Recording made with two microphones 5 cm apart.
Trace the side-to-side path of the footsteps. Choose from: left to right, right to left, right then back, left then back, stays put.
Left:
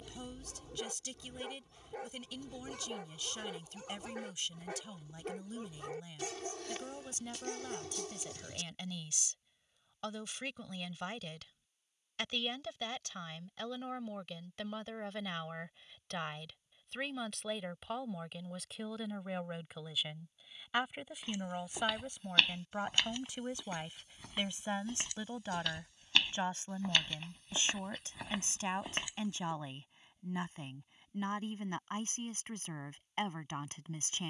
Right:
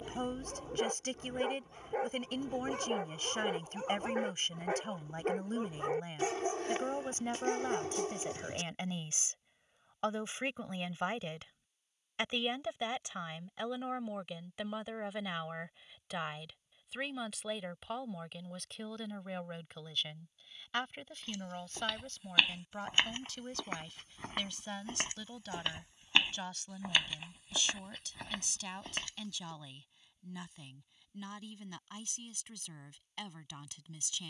right then back.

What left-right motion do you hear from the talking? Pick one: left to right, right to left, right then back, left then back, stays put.
right to left.